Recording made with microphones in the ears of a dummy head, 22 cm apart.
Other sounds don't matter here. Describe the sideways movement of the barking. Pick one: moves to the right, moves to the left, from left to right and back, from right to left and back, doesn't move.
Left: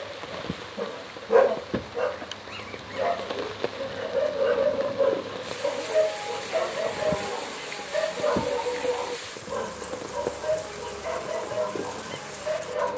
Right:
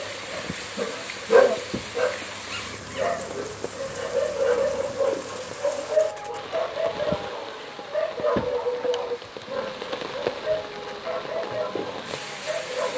moves to the left.